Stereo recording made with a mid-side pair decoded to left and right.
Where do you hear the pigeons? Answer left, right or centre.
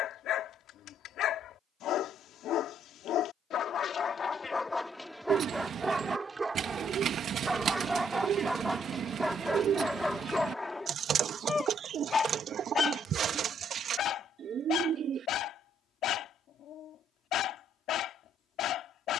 right.